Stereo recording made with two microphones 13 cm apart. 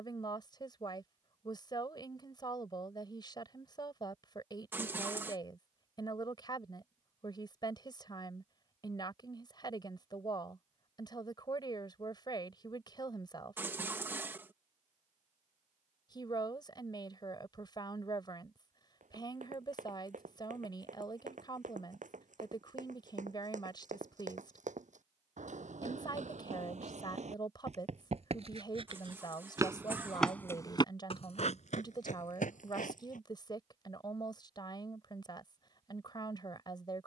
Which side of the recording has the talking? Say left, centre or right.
left.